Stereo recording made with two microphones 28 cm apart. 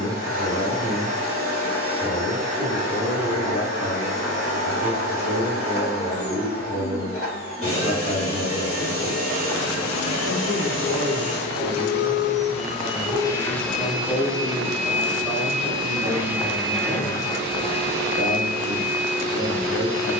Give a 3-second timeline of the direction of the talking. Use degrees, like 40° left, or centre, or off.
60° right, 60° right, 60° right, 60° right, centre, 10° right, 50° right.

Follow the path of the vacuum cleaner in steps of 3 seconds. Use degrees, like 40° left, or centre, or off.
50° left, 50° left, 50° left, 50° left, 10° left, centre, 40° left.